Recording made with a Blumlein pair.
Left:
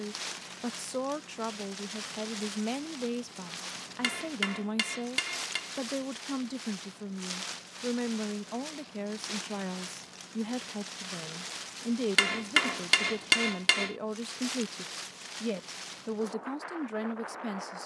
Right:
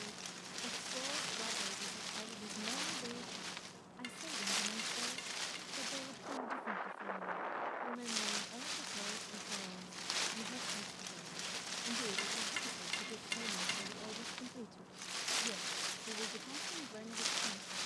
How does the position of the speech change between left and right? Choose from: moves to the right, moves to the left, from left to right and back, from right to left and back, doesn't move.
doesn't move.